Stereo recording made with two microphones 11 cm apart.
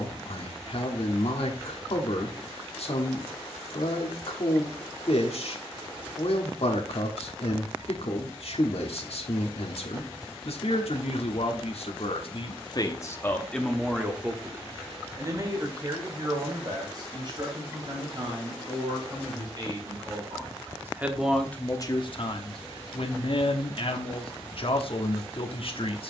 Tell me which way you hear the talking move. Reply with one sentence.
In this clip you hear the talking move from left to right and back again.